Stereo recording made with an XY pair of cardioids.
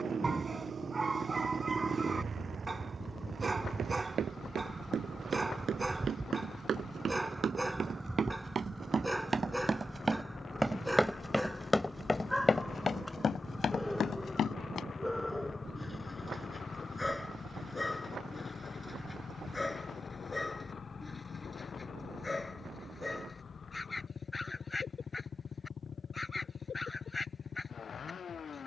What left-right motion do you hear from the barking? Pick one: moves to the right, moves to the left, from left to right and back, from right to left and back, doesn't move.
moves to the left.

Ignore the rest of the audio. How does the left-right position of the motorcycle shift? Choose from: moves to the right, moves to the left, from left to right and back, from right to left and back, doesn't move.
moves to the left.